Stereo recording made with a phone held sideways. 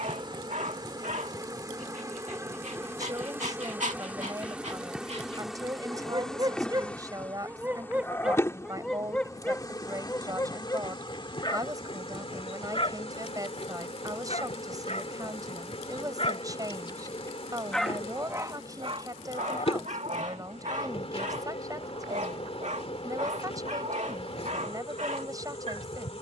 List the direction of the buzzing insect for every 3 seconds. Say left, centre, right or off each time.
right, centre, centre, left, left, left, left, left, left.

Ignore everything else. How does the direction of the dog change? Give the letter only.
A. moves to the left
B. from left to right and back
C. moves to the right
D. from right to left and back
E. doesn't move
D.